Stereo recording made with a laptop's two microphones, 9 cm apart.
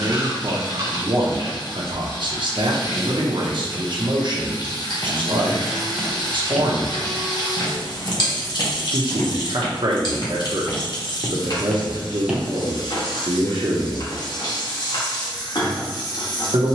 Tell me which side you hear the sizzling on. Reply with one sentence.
In this clip you hear the sizzling on the left.